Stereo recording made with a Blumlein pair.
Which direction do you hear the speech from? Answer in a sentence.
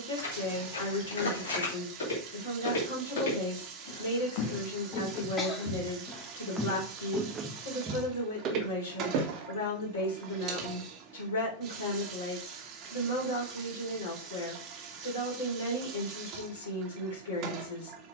You can hear the speech on the left.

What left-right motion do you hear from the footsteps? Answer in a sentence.
You can hear the footsteps go from the left side to the right.